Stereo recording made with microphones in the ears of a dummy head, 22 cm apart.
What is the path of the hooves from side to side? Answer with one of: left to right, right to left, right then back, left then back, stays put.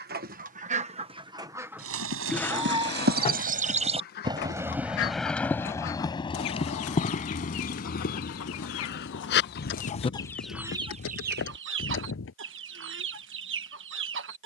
right to left.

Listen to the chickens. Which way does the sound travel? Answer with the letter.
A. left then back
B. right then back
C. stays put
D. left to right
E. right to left
A.